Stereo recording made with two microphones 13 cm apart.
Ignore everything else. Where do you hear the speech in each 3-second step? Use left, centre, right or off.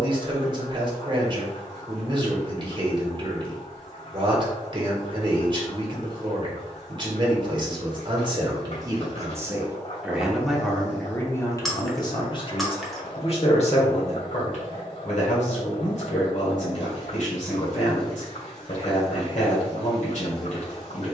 right, right, right, centre, left, left, left.